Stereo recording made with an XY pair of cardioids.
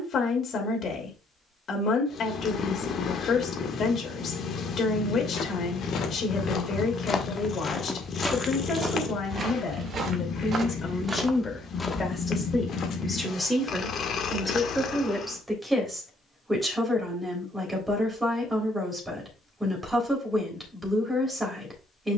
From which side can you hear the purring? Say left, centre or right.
left.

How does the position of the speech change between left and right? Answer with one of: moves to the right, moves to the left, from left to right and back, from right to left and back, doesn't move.
moves to the right.